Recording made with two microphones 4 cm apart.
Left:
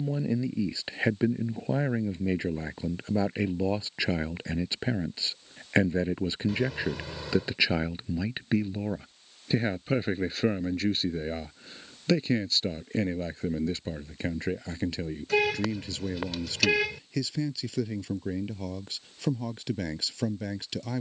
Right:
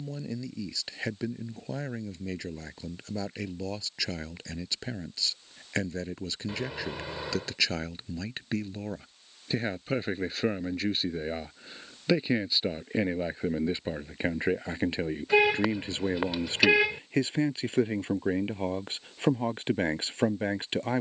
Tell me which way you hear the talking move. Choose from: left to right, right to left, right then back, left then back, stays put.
left to right.